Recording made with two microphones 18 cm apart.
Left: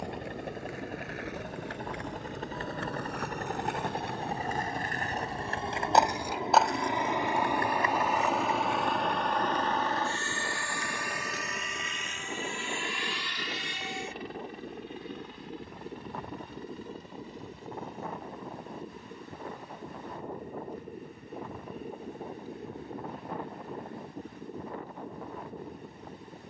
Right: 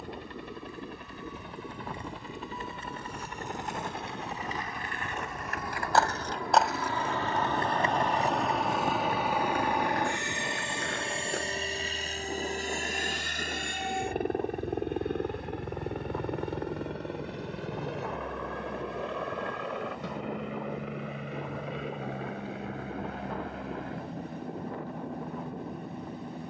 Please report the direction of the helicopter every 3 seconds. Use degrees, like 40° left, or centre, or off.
50° left, 30° left, 10° left, 20° right, 40° right, 60° right, 70° right, 80° right, 80° right.